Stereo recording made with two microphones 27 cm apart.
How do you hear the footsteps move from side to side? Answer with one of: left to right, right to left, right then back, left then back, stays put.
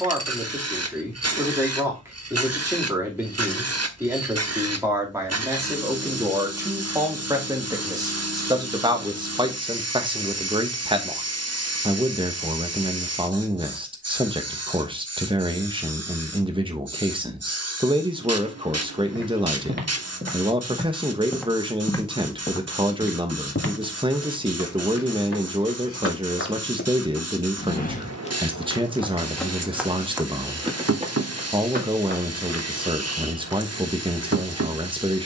left then back.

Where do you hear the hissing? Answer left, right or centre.
right.